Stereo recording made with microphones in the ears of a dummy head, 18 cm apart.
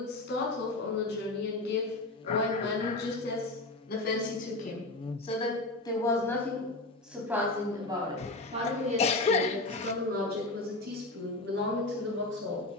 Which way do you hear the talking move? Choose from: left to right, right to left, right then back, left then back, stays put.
left to right.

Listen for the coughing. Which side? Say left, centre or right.
left.